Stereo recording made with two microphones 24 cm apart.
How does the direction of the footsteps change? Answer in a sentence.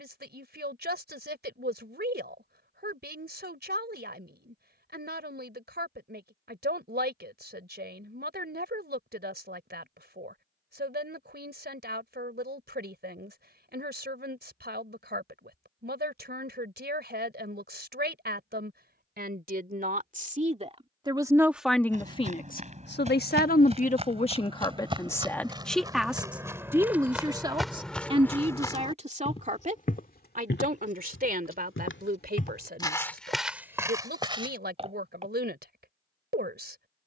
You can hear the footsteps go left and come back.